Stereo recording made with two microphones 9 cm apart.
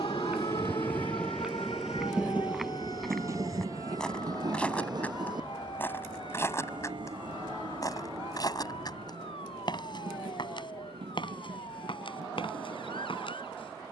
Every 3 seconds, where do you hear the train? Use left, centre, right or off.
centre, right, right, right, right.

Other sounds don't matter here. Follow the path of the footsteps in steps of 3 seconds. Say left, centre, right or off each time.
centre, centre, left, left, left.